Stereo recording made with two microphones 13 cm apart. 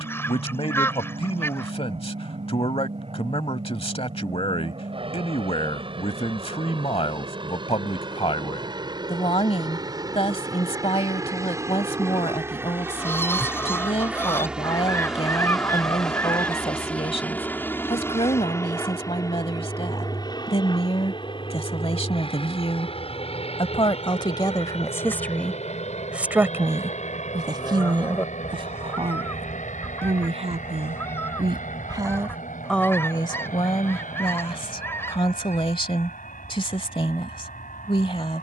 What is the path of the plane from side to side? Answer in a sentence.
You can hear the plane go from the right side to the left.